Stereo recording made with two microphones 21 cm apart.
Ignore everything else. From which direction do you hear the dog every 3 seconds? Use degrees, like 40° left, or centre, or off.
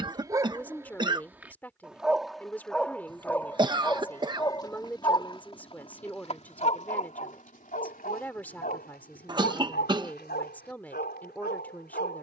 10° right, 20° left, 40° left, 50° left.